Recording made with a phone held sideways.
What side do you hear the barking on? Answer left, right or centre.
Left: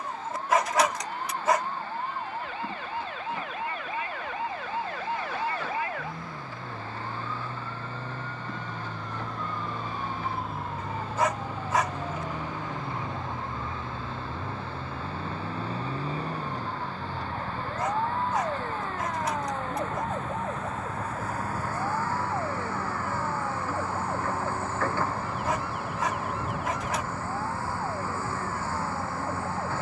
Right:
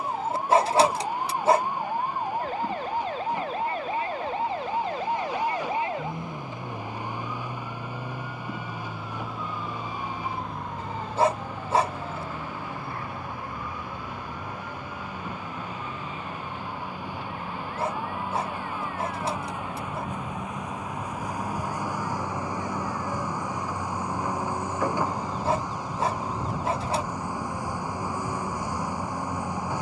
right.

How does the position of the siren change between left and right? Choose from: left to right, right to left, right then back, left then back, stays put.
right to left.